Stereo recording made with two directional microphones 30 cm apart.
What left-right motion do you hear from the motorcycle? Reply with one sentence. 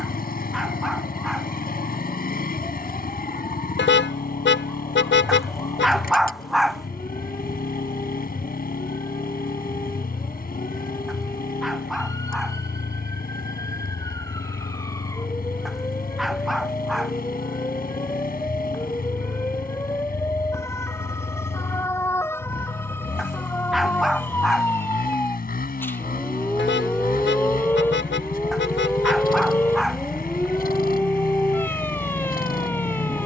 You can hear the motorcycle stay put.